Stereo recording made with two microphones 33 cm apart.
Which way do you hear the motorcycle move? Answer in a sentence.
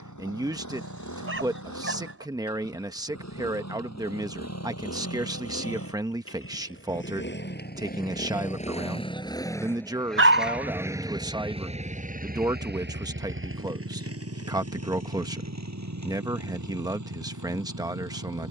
You can hear the motorcycle move from left to right.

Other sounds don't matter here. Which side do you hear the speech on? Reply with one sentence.
In this clip you hear the speech in the centre.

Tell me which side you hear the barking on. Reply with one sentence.
You can hear the barking on the right.